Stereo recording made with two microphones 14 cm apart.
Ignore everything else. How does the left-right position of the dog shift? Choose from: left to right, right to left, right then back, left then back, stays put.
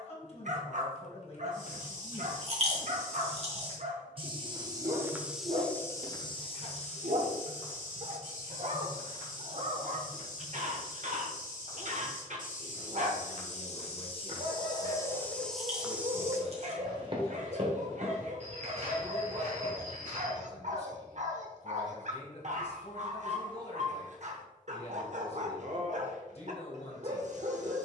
stays put.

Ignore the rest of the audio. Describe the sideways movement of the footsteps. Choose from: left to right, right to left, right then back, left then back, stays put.
left then back.